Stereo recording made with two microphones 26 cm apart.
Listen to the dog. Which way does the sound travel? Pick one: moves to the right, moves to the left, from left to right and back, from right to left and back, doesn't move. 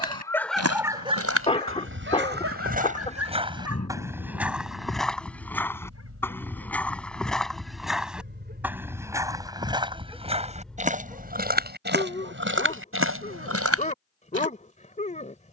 from left to right and back.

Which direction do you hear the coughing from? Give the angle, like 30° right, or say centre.
20° left.